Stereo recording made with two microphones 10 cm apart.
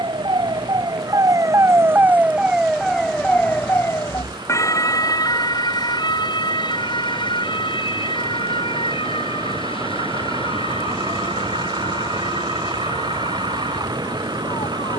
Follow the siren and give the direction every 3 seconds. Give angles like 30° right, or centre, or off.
30° right, 30° left, 50° left, 60° left, 70° left.